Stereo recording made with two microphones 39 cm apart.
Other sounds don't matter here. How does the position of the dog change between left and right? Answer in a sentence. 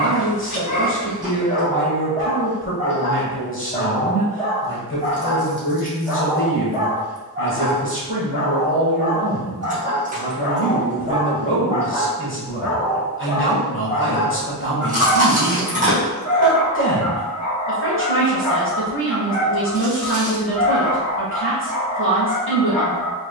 You can hear the dog go right and come back.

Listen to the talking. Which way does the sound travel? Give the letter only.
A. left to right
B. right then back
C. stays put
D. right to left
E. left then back
C.